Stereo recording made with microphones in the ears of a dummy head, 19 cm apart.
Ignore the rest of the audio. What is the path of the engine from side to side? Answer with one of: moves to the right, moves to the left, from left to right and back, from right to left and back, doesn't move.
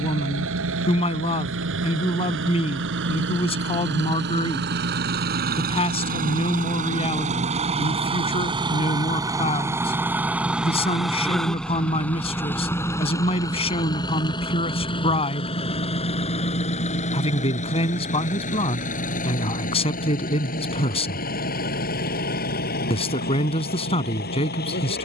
moves to the left.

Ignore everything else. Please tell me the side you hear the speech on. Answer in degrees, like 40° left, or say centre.
30° left.